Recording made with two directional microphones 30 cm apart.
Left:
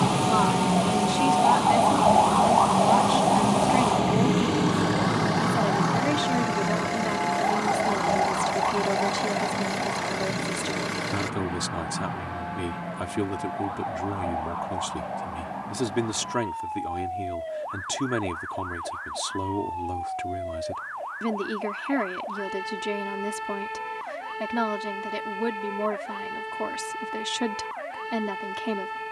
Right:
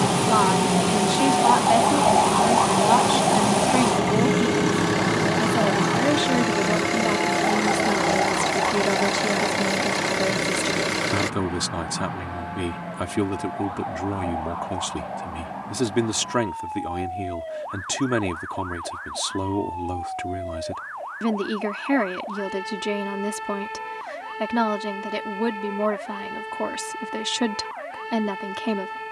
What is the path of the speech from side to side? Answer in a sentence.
You can hear the speech stay in one place.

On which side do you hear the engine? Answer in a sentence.
You can hear the engine on the right.